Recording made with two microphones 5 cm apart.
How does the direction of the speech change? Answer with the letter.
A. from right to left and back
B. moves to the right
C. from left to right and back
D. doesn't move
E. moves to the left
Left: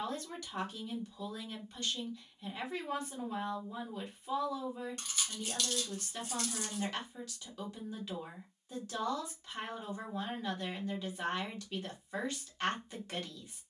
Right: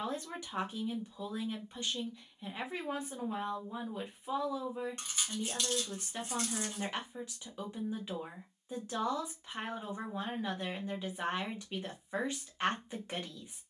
D.